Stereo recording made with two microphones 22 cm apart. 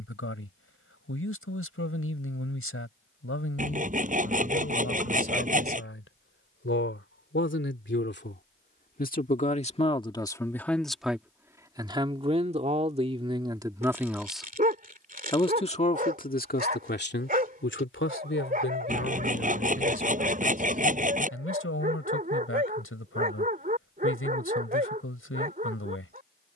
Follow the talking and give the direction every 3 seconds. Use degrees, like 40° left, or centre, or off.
80° left, 80° left, 60° left, 10° left, 20° right, 40° left, 70° left, 80° left, 80° left.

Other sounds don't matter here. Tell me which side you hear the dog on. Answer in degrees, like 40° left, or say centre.
40° right.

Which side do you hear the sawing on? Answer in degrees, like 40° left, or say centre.
40° right.